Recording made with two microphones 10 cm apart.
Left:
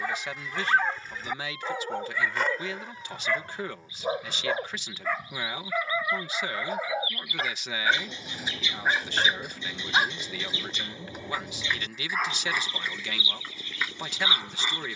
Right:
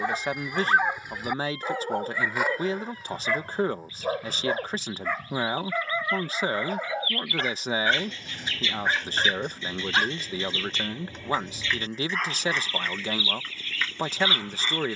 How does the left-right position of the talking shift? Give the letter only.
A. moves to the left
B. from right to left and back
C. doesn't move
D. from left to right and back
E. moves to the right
C.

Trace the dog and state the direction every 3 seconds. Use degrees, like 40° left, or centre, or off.
10° right, centre, centre, 10° left, 10° left.